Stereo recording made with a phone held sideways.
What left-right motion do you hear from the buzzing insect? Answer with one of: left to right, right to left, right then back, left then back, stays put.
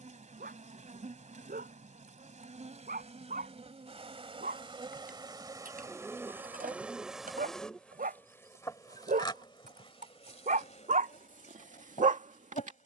right to left.